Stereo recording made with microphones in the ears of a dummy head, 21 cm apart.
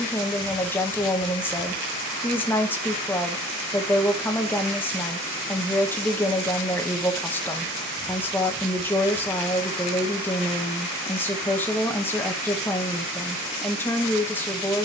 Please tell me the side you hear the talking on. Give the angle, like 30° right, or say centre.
10° left.